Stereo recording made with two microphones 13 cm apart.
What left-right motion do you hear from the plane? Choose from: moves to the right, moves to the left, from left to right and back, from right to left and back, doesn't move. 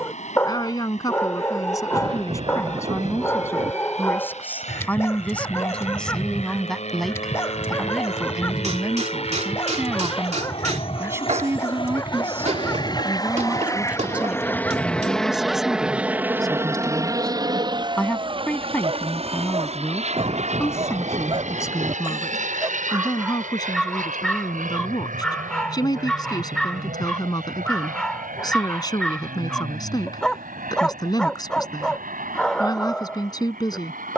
moves to the right.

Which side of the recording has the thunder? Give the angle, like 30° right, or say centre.
40° right.